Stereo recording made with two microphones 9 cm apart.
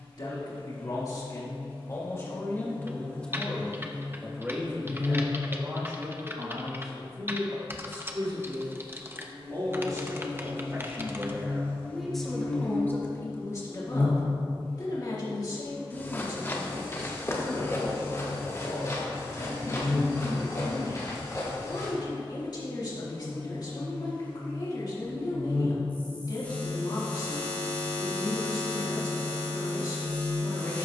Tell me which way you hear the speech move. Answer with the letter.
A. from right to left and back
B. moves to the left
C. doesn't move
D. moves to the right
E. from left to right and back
E.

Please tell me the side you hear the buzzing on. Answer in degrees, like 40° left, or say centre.
20° left.